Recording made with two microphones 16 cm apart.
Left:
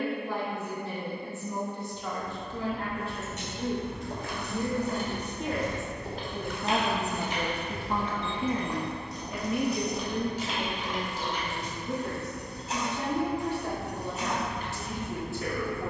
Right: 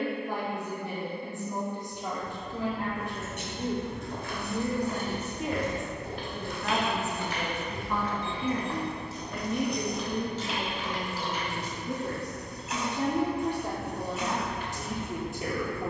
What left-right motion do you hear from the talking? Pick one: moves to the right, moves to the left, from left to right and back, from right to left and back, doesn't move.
from right to left and back.